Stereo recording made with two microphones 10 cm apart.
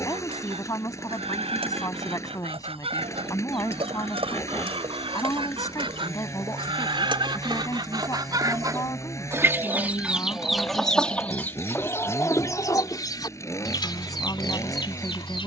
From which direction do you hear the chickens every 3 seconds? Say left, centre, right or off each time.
right, right, right, centre, left.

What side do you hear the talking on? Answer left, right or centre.
left.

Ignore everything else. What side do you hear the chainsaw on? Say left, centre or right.
left.